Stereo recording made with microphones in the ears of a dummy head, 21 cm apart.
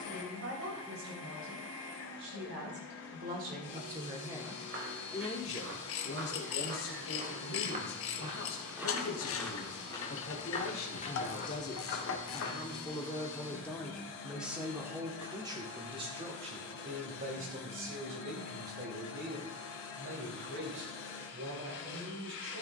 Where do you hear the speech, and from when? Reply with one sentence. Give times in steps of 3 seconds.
In this clip you hear the speech on the right from 0 s, in the centre from 3 s, on the left from 6 s, in the centre from 12 s and on the right from 15 s.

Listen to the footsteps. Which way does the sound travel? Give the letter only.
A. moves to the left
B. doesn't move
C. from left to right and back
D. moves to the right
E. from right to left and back
A.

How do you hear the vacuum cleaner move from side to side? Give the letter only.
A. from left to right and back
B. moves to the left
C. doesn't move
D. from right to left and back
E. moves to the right
C.